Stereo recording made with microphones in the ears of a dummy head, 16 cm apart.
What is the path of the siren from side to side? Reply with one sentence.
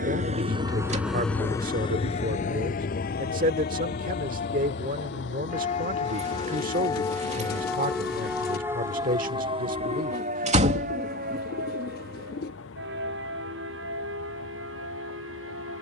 In this clip you hear the siren move to the right.